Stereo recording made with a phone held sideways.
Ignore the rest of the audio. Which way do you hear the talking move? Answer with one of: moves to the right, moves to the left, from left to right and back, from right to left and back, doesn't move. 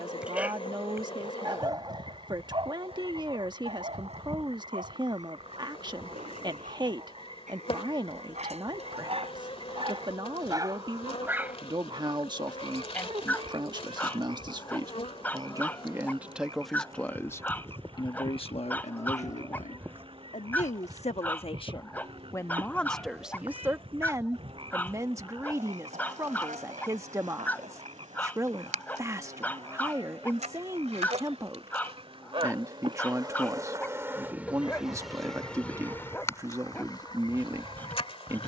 from right to left and back.